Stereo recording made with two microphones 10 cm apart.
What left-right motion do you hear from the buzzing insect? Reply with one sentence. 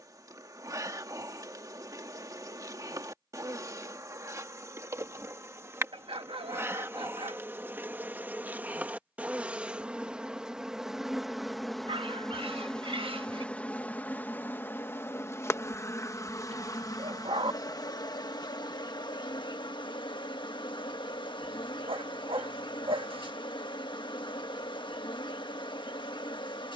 You can hear the buzzing insect move to the left.